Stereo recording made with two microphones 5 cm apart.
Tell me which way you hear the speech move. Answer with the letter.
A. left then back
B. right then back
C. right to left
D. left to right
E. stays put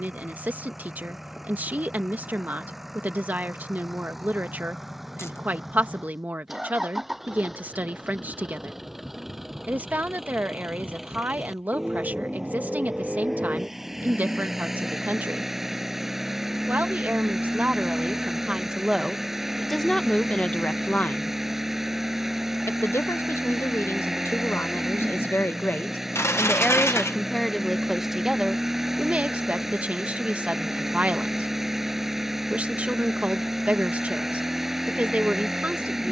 A.